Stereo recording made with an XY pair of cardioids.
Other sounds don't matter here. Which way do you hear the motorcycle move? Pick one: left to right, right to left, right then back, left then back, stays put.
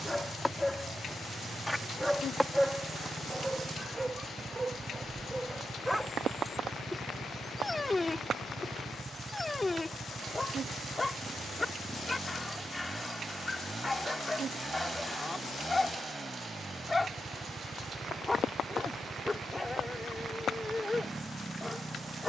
stays put.